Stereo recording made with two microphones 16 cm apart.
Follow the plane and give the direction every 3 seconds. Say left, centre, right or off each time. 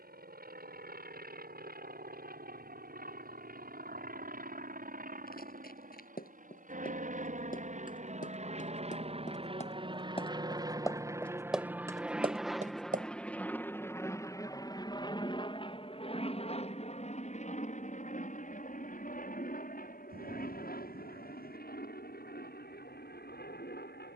right, right, right, right, centre, left, left, left.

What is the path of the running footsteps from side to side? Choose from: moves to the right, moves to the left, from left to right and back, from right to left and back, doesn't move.
moves to the right.